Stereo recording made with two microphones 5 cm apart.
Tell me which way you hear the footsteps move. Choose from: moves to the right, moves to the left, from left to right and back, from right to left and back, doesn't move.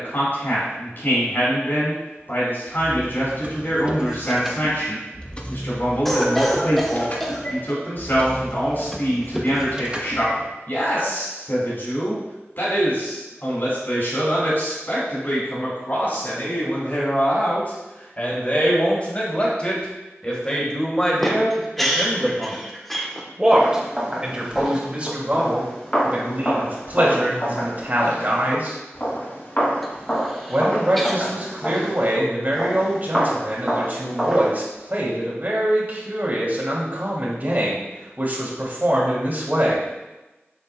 from right to left and back.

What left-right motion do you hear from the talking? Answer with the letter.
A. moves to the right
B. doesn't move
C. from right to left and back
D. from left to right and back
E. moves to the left
A.